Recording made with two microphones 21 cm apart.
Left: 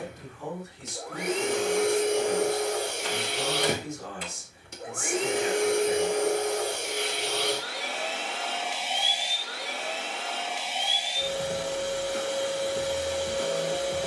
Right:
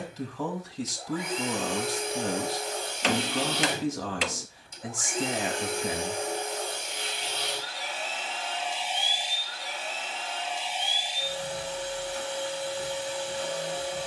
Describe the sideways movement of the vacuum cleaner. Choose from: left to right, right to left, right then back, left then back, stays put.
stays put.